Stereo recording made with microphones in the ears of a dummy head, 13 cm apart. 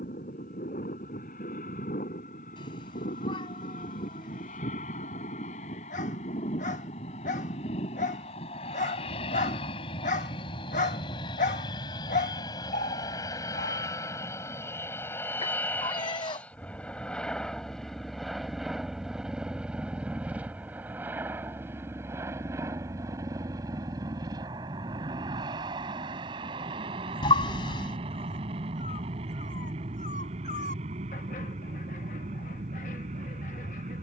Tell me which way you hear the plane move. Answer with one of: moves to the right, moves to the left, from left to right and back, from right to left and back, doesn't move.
moves to the right.